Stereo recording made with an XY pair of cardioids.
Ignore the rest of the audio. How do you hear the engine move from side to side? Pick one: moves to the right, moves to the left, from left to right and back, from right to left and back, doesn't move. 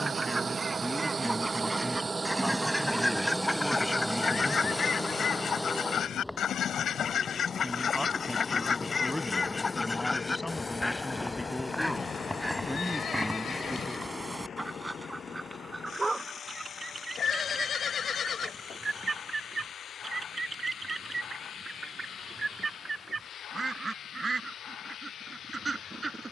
moves to the left.